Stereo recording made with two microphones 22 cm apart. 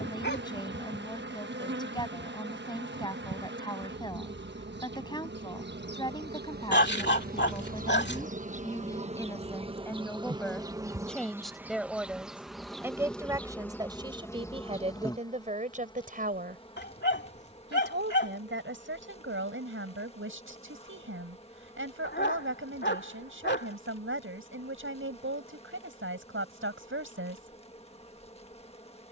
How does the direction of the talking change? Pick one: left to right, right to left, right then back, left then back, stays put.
left to right.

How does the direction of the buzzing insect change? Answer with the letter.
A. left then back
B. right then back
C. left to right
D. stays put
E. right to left
E.